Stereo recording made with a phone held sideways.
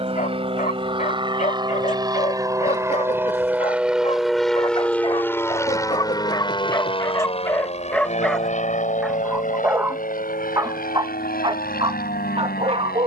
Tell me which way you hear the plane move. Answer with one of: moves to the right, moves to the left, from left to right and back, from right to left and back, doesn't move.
moves to the left.